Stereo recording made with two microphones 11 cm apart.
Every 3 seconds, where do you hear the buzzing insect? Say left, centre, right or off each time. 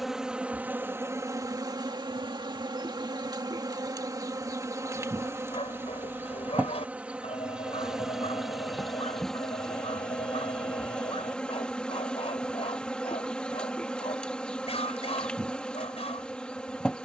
right, right, centre, centre, centre, centre.